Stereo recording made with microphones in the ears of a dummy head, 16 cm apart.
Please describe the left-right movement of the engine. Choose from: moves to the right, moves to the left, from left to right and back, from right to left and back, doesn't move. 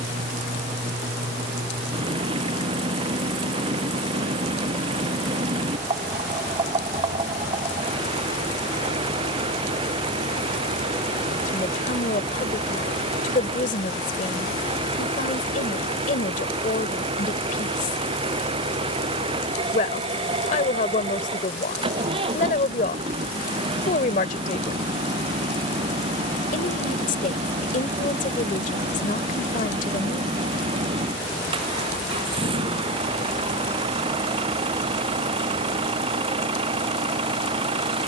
doesn't move.